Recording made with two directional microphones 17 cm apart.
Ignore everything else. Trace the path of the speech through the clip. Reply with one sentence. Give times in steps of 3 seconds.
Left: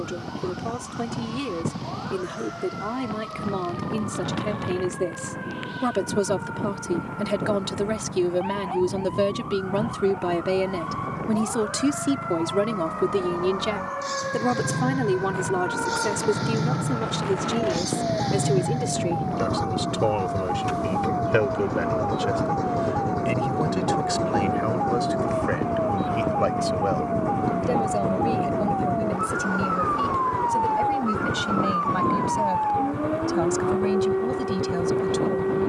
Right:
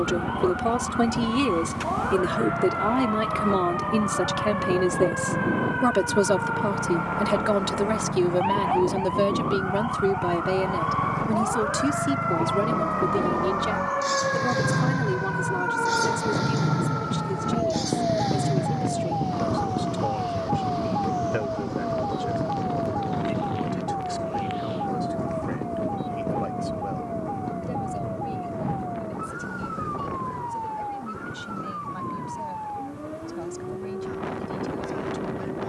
You can hear the speech on the right from 0 s, in the centre from 6 s and on the left from 12 s.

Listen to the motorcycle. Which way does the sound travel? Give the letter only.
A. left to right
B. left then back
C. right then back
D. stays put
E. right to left
E.